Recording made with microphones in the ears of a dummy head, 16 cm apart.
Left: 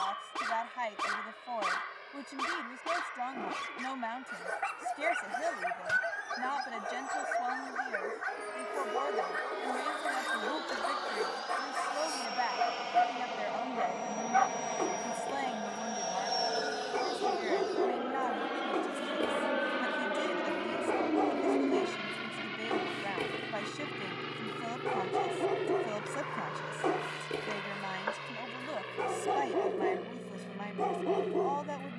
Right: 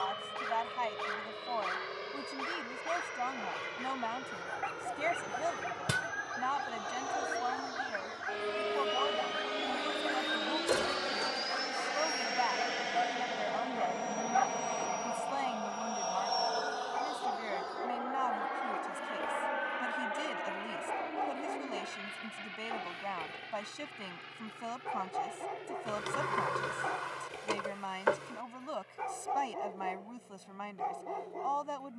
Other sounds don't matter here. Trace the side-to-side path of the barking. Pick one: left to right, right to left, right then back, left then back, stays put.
stays put.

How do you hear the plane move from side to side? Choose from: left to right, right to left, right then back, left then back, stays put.
right to left.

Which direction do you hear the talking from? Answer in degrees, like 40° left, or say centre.
10° left.